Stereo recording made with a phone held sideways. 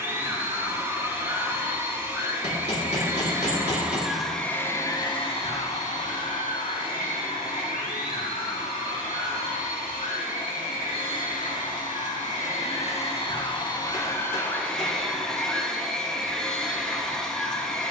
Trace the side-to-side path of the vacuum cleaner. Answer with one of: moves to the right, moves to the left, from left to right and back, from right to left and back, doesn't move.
from right to left and back.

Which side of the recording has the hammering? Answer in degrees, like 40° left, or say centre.
50° left.